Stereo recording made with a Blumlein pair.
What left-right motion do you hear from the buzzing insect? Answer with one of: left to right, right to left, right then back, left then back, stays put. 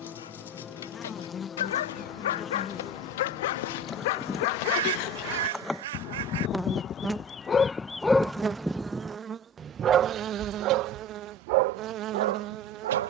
left to right.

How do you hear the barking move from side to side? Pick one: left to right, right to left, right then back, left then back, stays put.
left to right.